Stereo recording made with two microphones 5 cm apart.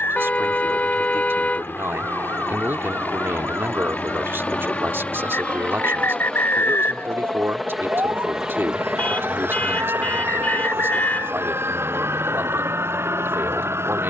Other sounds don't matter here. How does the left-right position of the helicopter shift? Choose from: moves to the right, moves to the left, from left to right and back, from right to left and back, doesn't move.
moves to the right.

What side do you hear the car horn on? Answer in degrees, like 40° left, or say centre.
40° left.